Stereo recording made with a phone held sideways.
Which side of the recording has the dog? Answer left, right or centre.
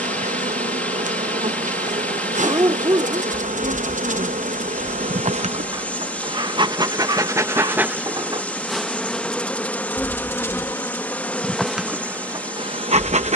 right.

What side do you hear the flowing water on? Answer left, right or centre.
centre.